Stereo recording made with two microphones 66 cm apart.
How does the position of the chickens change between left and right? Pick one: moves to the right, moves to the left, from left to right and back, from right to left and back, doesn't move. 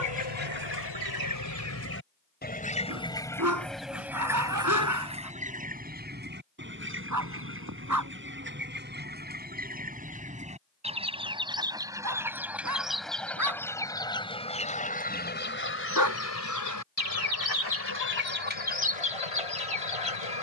from left to right and back.